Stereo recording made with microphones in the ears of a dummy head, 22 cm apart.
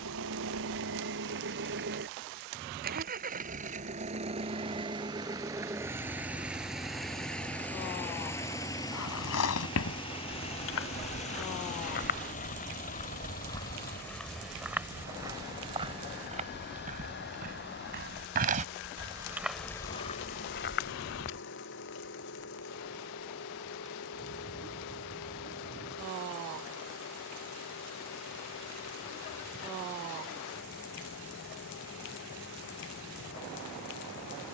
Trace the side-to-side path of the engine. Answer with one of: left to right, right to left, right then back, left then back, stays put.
right to left.